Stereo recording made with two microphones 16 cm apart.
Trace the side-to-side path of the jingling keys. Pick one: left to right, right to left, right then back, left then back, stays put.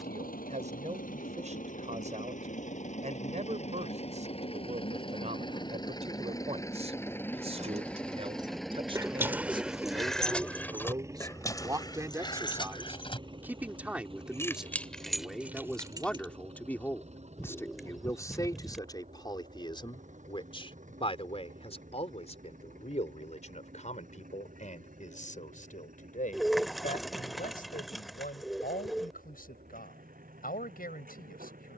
left then back.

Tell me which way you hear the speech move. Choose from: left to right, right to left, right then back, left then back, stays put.
right to left.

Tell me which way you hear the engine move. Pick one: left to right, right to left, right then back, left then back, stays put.
left to right.